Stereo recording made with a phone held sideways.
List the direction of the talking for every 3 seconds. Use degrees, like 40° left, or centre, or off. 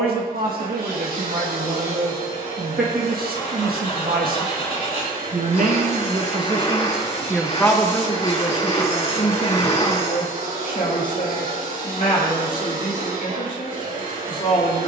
70° right, 70° right, centre, 50° left, 60° left.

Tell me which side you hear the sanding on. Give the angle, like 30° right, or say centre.
40° left.